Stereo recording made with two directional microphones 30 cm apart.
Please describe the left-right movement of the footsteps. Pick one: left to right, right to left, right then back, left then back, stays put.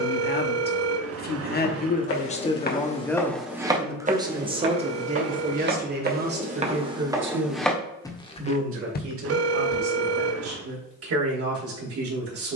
right then back.